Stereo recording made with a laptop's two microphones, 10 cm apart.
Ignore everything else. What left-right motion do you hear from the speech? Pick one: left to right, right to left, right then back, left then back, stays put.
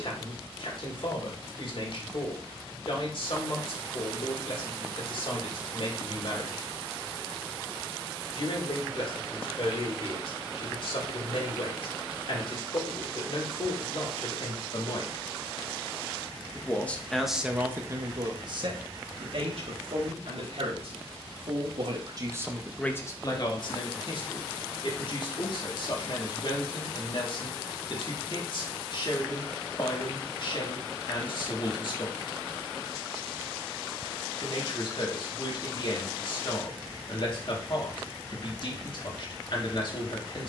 right then back.